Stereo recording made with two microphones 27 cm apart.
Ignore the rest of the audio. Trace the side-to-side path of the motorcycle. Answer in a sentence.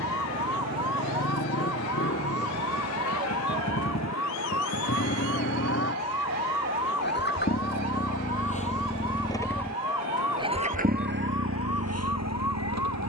In this clip you hear the motorcycle travel towards the right.